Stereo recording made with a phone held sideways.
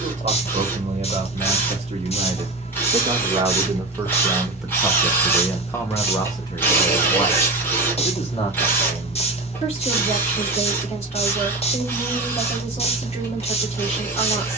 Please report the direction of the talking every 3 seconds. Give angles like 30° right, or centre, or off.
50° right, 10° right, 40° left, 50° left, 50° left.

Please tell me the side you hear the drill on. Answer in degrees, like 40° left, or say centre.
10° left.